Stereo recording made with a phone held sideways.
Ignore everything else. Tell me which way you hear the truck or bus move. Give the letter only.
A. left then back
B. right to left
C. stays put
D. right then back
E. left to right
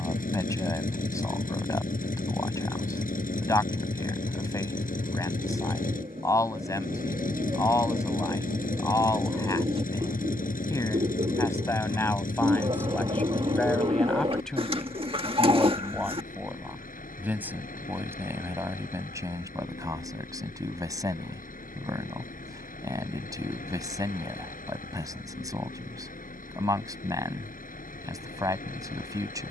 C.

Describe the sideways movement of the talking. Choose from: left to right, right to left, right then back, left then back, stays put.
left to right.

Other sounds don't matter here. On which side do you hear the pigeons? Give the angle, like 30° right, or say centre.
40° right.